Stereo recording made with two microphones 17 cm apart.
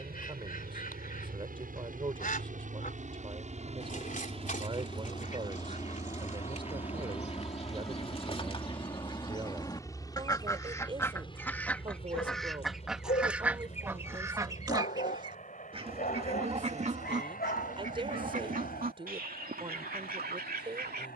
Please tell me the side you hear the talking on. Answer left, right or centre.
right.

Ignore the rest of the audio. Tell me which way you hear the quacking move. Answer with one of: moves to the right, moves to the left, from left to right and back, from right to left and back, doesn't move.
moves to the right.